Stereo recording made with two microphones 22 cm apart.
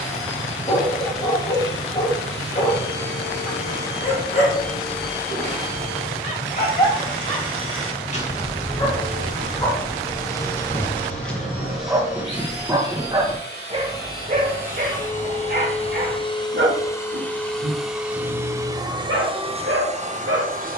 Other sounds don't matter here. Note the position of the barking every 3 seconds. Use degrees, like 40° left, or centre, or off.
40° left, 40° left, 30° left, 10° left, 20° right, 50° right, 70° right.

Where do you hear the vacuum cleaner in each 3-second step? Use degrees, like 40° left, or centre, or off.
70° left, 70° left, 70° left, 60° left, 50° left, 20° left, 20° right.